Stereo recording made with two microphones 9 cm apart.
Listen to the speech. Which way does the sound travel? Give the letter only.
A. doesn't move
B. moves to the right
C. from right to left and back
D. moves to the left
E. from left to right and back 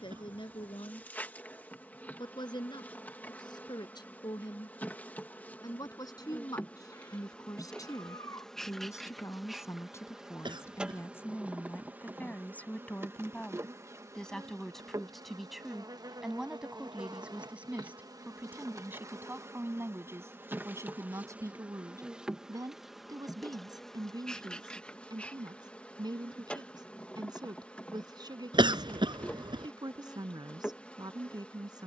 B.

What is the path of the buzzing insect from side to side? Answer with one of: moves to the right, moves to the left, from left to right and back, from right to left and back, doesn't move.
from left to right and back.